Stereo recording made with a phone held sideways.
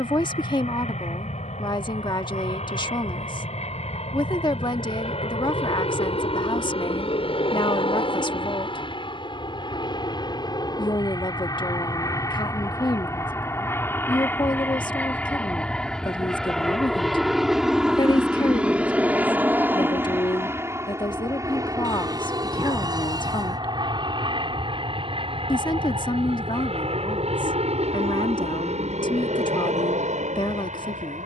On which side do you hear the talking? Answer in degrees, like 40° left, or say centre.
30° left.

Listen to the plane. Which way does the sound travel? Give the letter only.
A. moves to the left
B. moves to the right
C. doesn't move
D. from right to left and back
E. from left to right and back
B.